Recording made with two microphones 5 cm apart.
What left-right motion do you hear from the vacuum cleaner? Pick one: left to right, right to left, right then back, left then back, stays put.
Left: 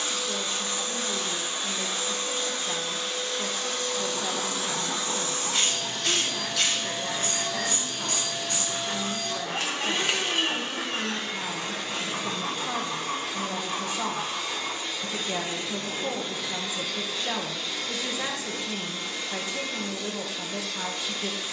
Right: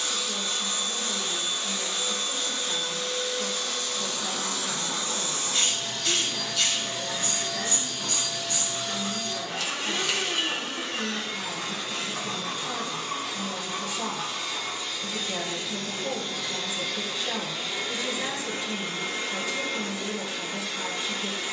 left to right.